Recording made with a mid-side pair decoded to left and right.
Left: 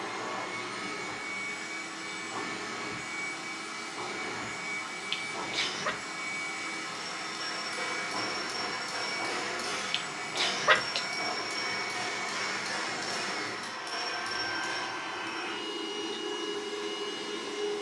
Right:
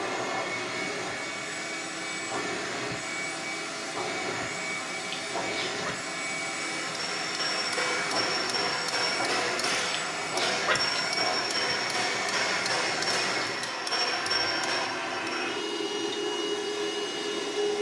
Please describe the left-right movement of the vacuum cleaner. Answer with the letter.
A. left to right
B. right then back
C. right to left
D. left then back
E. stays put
E.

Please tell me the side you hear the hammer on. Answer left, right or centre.
right.